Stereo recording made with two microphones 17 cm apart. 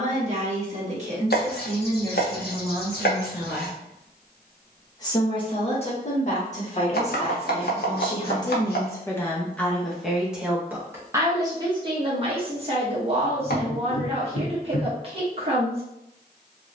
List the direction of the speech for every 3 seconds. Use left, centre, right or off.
right, centre, left, centre, right, right.